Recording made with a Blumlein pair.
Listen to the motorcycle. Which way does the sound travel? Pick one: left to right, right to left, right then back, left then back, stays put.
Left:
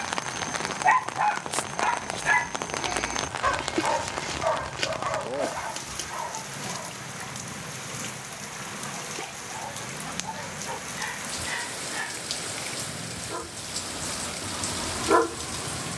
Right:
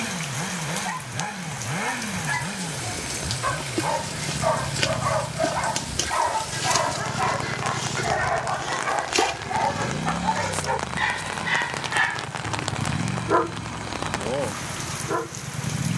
stays put.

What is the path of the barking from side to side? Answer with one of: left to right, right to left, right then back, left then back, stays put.
right then back.